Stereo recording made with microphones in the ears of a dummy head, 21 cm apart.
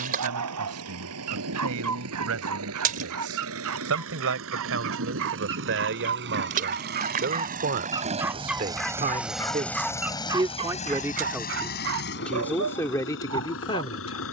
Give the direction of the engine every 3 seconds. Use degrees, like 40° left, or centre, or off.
70° right, 60° right, 40° right, 20° left, 60° left.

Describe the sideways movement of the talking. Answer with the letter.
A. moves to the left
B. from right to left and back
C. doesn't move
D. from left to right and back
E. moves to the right
A.